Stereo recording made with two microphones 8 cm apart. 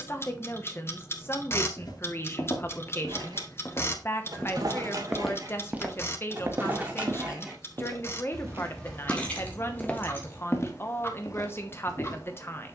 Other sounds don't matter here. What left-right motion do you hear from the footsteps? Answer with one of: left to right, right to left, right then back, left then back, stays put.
right then back.